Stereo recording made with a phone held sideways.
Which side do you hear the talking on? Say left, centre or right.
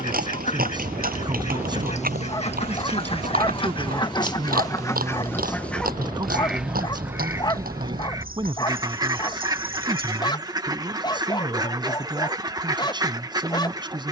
right.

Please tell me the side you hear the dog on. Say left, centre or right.
left.